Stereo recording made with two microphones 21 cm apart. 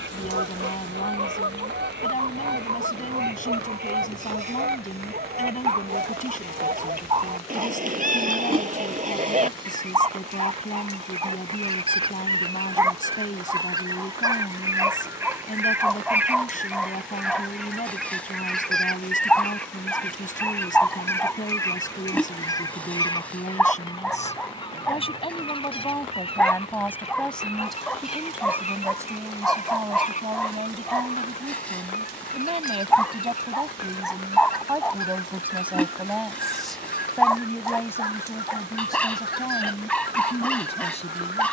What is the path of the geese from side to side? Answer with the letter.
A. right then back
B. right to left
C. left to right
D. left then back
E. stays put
B.